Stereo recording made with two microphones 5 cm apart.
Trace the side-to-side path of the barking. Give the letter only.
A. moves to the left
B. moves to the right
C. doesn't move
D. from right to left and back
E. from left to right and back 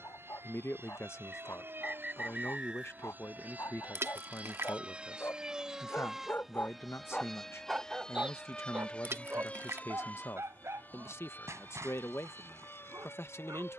B.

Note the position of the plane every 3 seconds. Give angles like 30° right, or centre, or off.
50° right, 30° right, 10° left, 30° left, 40° left.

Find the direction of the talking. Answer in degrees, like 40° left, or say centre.
60° left.